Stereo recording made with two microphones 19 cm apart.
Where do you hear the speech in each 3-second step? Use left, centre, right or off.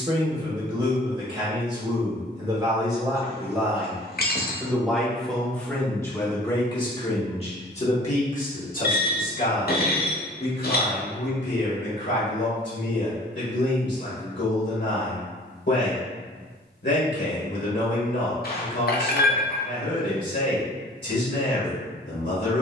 right, centre, left, left, left, left, left, left.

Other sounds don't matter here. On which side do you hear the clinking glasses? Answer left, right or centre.
left.